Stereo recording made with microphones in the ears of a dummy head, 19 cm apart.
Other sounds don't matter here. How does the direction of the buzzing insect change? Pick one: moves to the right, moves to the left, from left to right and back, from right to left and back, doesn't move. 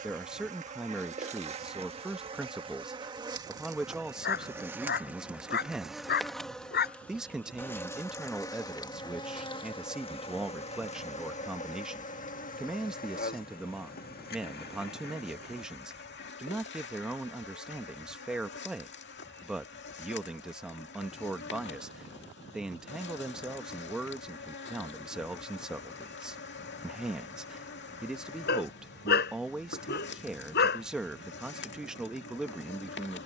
moves to the left.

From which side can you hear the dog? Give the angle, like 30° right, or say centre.
50° left.